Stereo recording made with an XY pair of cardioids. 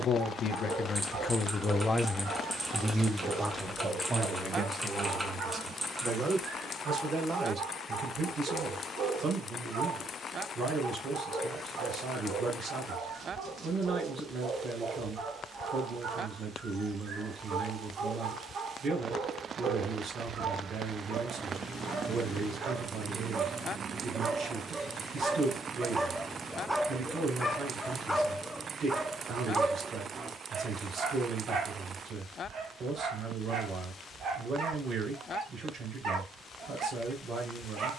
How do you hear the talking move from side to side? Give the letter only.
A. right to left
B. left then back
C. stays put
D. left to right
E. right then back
D.